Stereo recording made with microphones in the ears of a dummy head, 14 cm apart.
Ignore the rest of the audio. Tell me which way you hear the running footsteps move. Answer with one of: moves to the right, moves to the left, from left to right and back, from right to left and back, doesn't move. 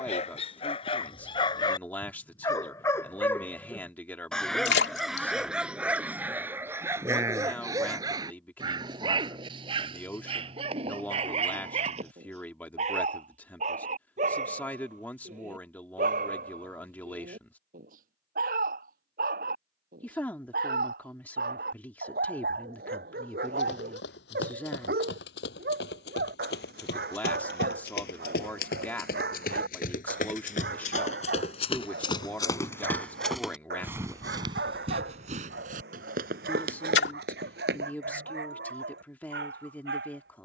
moves to the right.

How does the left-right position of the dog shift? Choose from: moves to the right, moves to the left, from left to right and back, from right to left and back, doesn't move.
moves to the right.